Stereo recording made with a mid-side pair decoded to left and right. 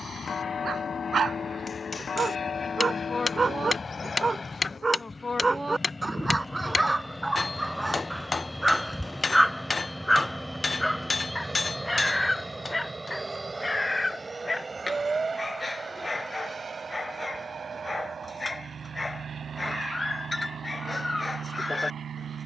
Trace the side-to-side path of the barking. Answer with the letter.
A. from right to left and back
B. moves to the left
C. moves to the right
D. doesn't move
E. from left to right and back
B.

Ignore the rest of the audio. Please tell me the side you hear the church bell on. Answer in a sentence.
In this clip you hear the church bell on the left.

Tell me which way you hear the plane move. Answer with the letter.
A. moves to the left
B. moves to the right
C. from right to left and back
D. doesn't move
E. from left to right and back
B.